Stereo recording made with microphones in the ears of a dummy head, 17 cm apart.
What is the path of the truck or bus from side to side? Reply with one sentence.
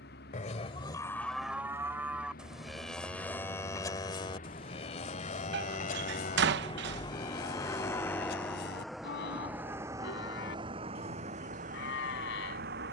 You can hear the truck or bus move from left to right.